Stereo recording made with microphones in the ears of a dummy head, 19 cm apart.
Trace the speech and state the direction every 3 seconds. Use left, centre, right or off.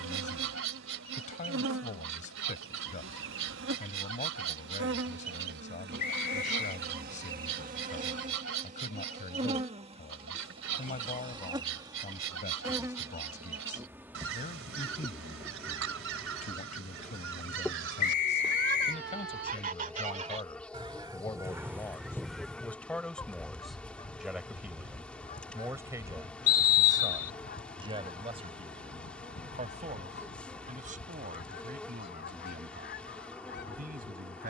left, left, left, left, left, left, left, centre, centre, right, right, right.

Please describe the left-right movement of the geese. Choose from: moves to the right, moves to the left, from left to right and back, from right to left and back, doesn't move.
moves to the left.